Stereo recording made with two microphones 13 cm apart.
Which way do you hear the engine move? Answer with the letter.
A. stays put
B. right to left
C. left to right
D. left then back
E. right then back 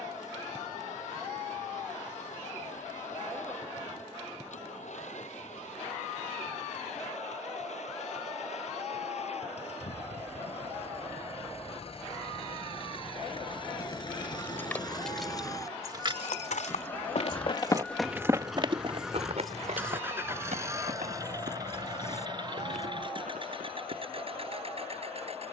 C.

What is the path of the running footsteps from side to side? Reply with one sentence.
You can hear the running footsteps move to the right.